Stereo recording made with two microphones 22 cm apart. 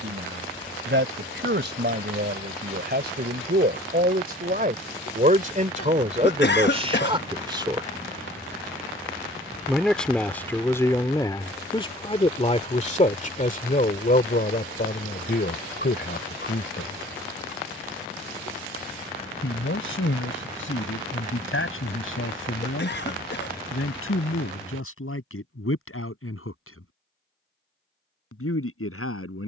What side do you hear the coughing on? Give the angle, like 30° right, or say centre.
50° left.